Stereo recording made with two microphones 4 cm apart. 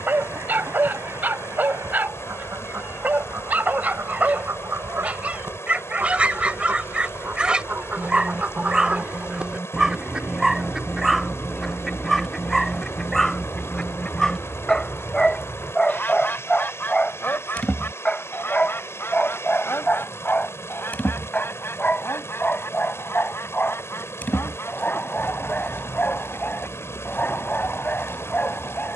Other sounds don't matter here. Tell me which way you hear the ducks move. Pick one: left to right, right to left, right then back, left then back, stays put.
right to left.